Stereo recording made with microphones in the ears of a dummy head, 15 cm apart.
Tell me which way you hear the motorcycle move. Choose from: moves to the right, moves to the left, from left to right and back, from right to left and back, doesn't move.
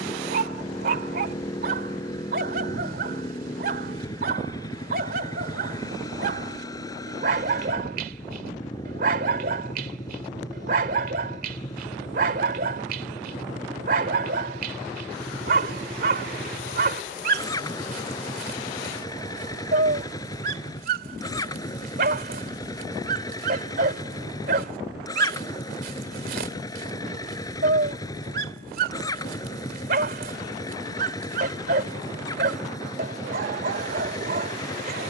doesn't move.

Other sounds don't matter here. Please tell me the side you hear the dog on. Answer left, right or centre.
right.